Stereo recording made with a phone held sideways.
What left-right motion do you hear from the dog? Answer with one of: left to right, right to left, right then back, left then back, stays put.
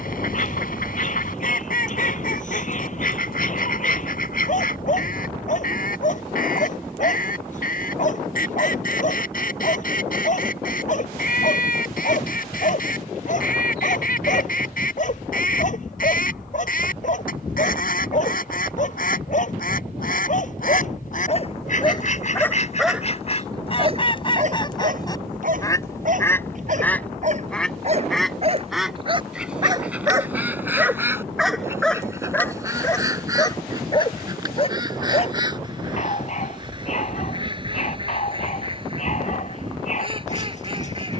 right then back.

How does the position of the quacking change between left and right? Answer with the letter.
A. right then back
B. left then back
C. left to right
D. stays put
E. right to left
C.